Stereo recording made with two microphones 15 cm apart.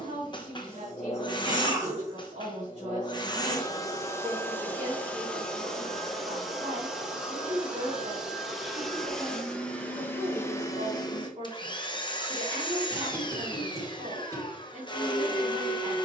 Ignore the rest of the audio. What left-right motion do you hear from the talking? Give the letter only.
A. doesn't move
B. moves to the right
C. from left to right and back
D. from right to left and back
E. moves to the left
A.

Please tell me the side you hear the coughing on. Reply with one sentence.
You can hear the coughing on the right.